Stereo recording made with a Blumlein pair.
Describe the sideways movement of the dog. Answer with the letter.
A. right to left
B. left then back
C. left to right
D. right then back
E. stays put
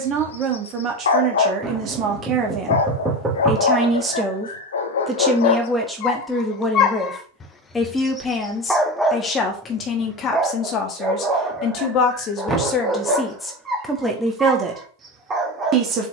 C.